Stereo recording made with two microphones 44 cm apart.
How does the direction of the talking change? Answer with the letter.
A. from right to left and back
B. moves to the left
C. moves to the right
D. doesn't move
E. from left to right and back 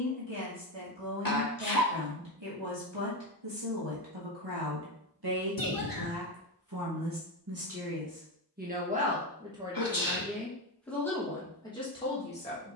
B.